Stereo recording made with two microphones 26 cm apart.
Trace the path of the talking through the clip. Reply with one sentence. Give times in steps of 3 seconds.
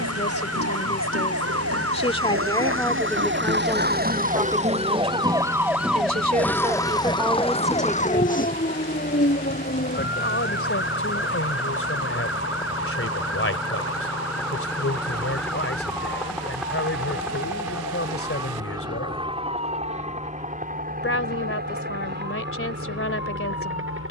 In this clip you hear the talking on the left from 0 s, in the centre from 3 s and on the left from 9 s.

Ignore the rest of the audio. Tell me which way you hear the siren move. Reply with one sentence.
You can hear the siren travel towards the left.